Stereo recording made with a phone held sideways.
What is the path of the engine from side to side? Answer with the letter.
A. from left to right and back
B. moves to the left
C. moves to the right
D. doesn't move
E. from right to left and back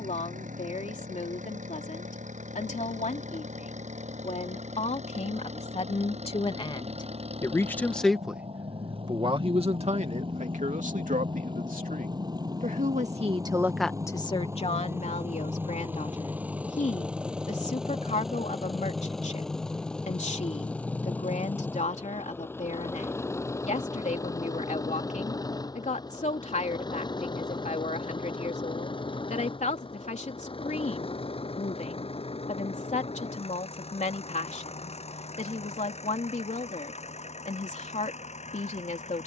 B.